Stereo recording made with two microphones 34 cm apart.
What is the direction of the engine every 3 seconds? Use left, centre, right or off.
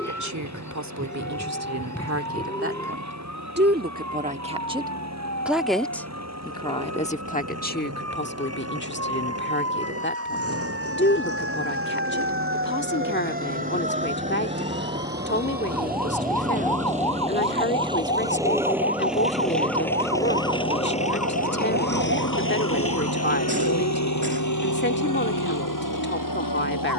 right, right, right, right, right, right, centre, left, left.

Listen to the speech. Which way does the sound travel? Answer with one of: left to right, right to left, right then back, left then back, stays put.
right to left.